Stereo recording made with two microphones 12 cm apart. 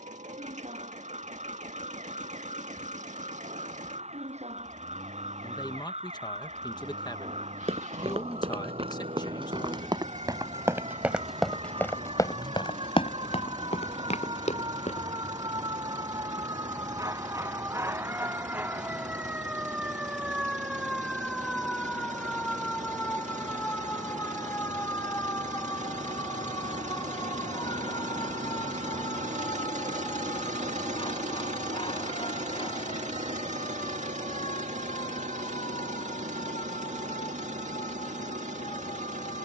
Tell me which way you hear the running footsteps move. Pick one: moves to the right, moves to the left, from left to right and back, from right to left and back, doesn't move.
moves to the left.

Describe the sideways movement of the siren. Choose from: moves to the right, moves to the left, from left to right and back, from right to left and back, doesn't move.
moves to the left.